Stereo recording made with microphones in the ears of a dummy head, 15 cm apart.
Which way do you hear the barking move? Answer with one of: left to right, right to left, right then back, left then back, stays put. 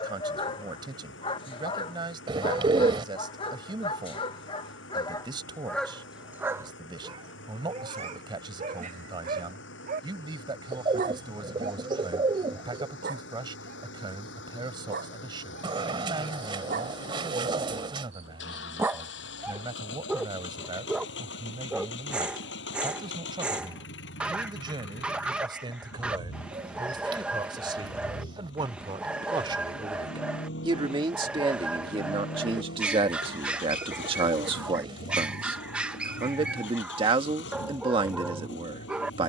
right then back.